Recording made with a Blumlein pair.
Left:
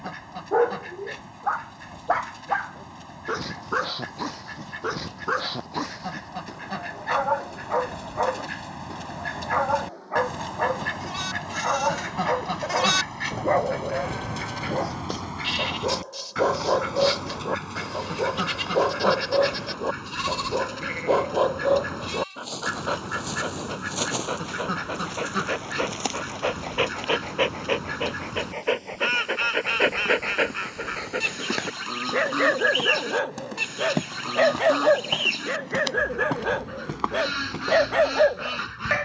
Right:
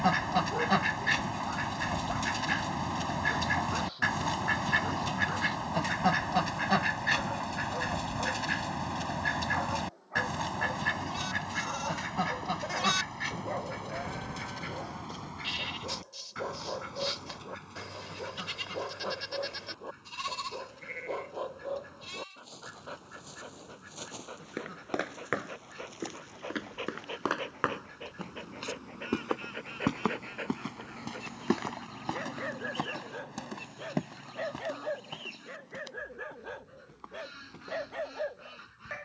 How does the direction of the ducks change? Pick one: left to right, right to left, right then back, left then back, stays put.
right to left.